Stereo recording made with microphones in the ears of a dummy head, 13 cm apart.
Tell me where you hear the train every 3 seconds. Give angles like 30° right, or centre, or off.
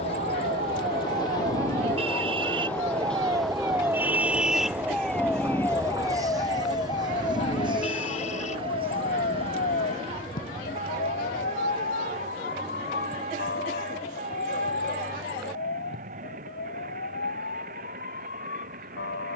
20° left, 10° right, 30° right, 40° right, 50° right, 50° right, 50° right.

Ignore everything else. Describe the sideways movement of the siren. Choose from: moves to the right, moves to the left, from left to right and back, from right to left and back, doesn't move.
moves to the left.